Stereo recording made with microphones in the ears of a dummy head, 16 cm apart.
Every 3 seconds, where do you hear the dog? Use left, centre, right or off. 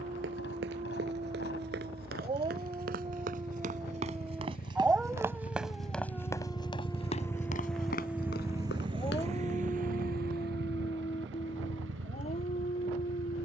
right, centre, centre, left, left.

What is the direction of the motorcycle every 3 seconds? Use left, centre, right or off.
left, left, centre, right, right.